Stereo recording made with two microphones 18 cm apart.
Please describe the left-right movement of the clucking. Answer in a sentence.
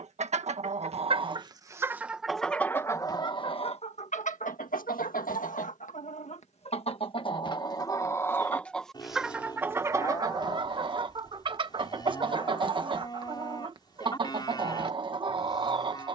You can hear the clucking go left and come back.